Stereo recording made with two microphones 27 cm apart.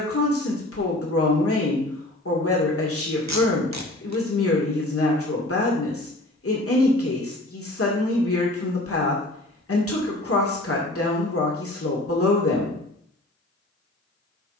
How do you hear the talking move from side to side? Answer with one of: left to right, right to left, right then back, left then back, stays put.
stays put.